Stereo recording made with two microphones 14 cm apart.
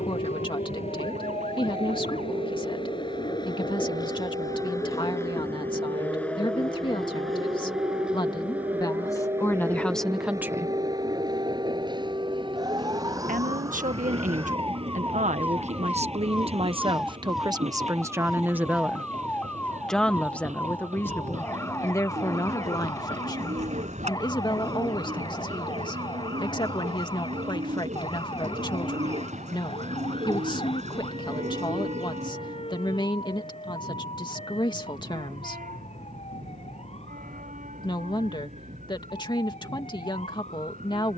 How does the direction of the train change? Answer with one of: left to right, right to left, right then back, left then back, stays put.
left to right.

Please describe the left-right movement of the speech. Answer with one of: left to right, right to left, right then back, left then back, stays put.
right then back.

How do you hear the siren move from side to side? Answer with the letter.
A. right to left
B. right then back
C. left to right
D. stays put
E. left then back
A.